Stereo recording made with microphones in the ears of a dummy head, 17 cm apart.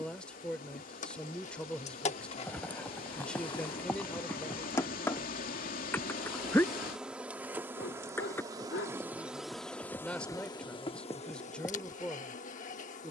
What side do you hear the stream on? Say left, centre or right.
left.